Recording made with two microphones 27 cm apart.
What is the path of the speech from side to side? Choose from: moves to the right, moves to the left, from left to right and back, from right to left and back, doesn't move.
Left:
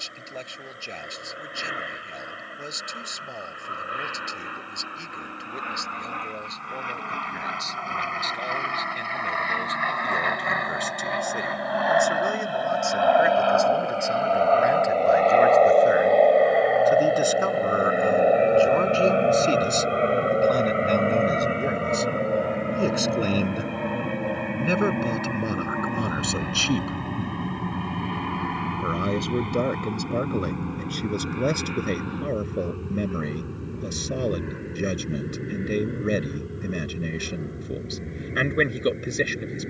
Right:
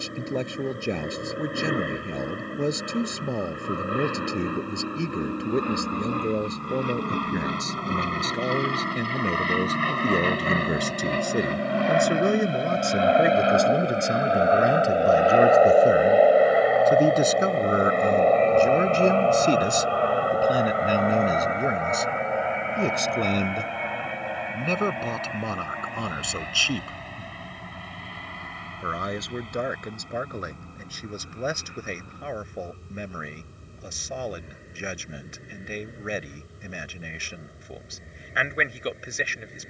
moves to the left.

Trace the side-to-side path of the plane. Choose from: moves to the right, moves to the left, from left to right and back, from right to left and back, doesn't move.
moves to the left.